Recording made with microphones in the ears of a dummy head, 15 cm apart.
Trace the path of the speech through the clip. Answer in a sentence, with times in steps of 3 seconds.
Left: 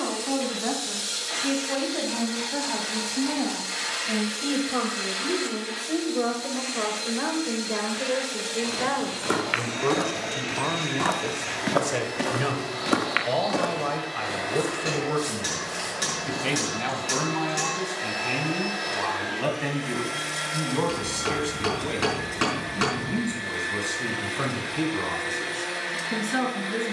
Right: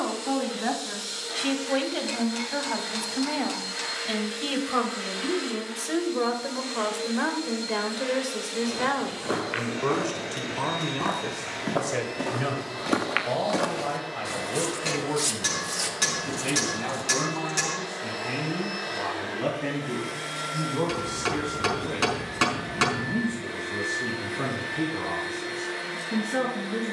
You can hear the speech on the right from 0 s, in the centre from 9 s and on the left from 12 s.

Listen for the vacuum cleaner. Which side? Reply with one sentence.
You can hear the vacuum cleaner on the left.